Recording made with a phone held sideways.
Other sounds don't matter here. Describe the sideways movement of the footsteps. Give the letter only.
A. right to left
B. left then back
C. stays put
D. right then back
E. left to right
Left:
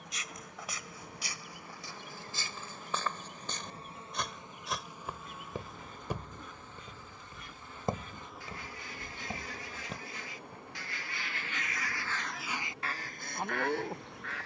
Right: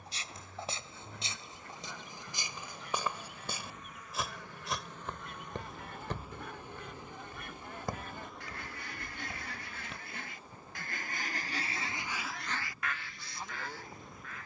A.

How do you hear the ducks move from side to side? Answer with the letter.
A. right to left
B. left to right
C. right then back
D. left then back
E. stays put
A.